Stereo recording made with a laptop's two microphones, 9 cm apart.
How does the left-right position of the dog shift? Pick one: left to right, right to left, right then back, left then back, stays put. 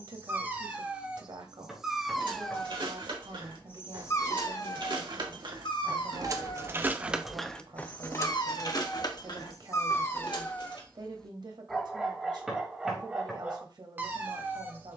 left then back.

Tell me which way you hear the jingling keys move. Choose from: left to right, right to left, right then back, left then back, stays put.
right to left.